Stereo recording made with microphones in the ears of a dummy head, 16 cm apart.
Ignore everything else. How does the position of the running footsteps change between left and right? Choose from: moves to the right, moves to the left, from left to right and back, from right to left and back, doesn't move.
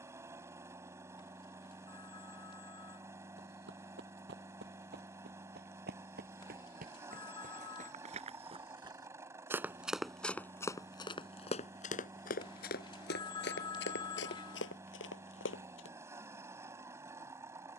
moves to the left.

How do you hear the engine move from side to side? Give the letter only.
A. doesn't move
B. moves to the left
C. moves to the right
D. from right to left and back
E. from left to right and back
A.